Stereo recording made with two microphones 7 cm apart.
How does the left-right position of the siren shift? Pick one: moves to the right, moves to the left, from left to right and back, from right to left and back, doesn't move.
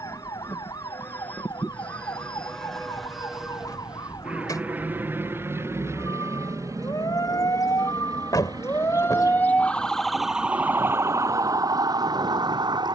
moves to the right.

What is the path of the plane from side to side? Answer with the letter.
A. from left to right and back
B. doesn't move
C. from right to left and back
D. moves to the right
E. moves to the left
D.